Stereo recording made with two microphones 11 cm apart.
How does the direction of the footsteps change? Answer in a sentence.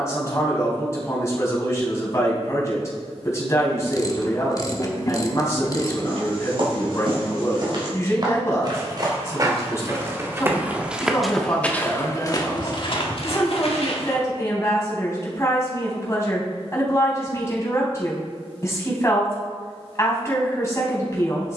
You can hear the footsteps move from right to left.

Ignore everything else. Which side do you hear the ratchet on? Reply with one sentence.
You can hear the ratchet on the left.